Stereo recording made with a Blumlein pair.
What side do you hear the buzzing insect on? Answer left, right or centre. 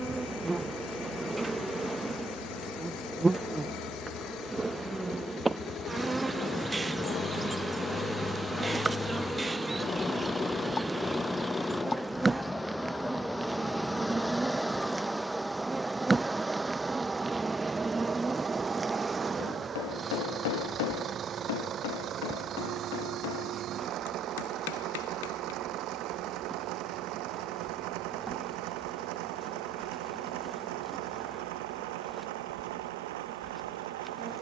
centre.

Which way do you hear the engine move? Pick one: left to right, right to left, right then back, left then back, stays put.
left to right.